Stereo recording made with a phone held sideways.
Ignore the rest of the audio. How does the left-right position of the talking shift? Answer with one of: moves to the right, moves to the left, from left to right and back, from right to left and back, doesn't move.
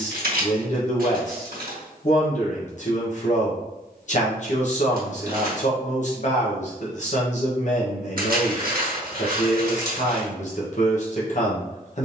doesn't move.